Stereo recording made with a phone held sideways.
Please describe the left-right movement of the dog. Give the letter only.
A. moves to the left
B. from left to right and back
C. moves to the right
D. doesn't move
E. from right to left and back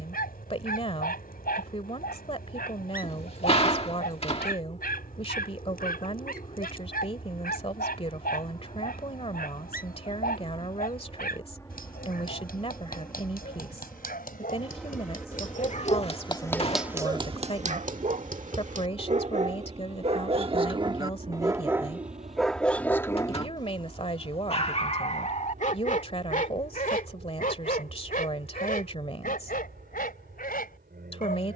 B.